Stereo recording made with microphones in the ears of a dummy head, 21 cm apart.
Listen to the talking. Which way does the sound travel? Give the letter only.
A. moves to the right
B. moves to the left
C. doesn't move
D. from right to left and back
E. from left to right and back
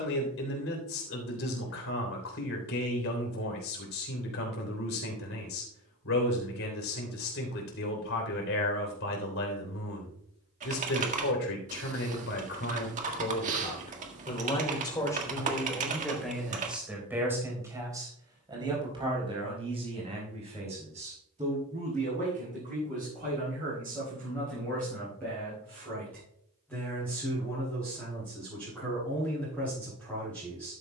A.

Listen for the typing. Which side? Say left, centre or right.
right.